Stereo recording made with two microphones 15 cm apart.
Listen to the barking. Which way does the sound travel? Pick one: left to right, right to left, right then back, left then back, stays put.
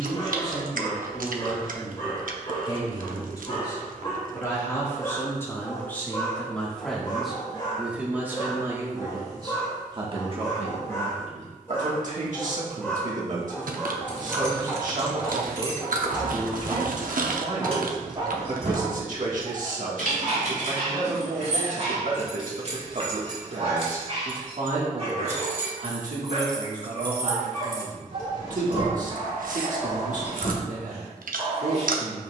left to right.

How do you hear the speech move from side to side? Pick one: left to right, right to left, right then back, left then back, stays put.
left to right.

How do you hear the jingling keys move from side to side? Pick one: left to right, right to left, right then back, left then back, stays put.
right then back.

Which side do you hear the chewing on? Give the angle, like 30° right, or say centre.
70° right.